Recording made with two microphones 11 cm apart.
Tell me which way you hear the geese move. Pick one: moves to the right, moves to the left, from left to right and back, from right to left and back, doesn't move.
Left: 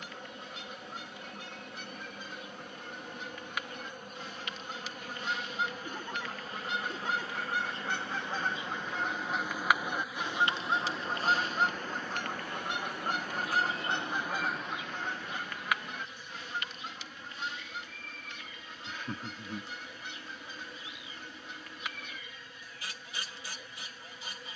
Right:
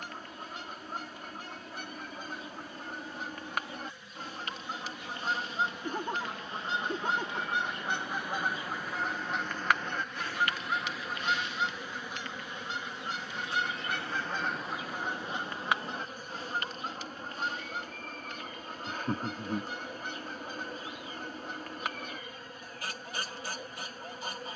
from right to left and back.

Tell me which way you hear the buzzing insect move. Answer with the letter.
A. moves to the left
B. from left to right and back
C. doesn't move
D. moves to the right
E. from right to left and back
D.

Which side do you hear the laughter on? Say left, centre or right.
right.